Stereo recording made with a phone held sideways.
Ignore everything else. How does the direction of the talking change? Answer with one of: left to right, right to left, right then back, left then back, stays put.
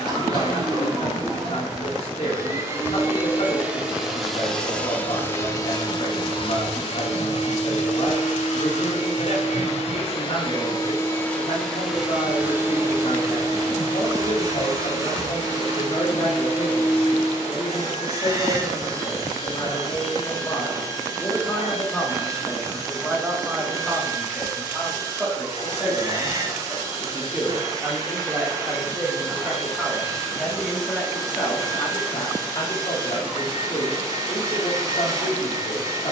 right then back.